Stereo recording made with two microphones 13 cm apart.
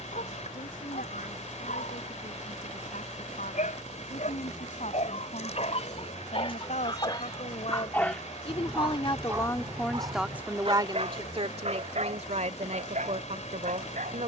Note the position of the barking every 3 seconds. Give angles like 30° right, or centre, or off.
80° left, 60° left, 20° left, 40° right, 60° right.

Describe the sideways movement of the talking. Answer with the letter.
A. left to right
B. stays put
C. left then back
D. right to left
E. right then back
A.